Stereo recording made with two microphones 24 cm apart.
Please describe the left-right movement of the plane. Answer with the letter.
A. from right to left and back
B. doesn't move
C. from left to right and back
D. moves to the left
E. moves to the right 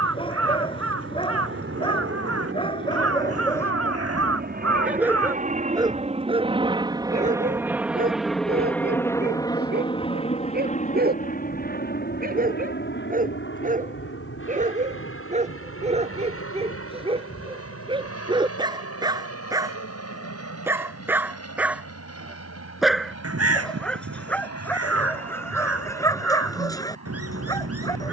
D.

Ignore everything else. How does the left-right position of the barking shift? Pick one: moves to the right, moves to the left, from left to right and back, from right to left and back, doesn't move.
from left to right and back.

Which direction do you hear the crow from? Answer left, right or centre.
right.